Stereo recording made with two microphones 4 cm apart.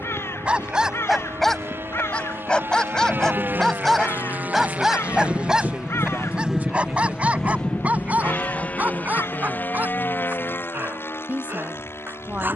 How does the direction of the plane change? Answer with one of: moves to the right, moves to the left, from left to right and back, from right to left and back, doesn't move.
moves to the left.